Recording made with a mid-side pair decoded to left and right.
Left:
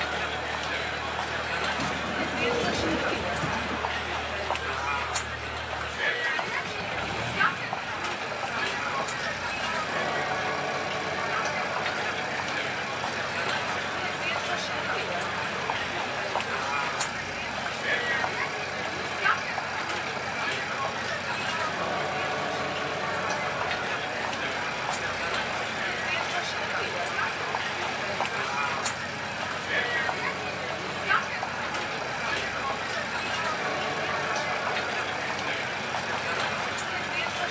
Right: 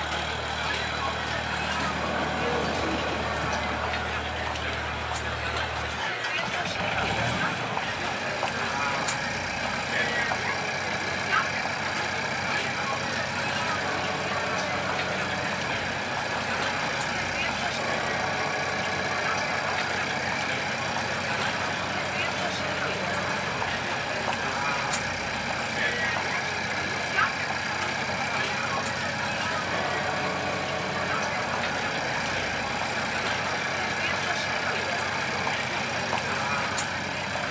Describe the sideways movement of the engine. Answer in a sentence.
In this clip you hear the engine stay in one place.